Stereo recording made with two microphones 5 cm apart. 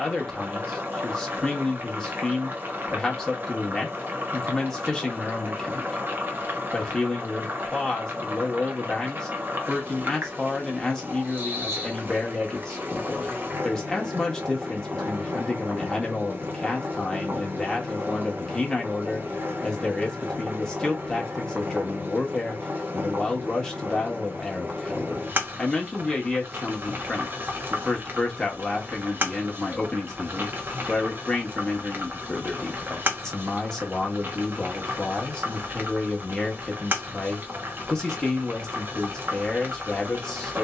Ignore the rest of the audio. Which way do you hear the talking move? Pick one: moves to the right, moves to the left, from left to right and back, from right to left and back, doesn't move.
doesn't move.